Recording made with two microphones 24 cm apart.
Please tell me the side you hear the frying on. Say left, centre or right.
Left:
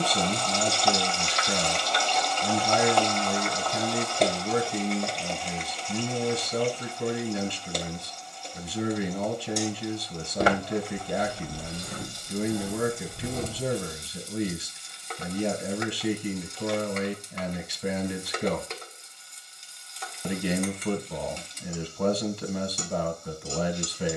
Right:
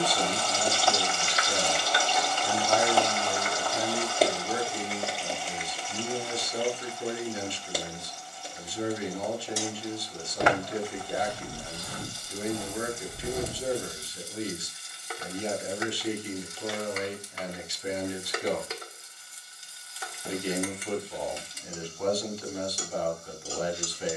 centre.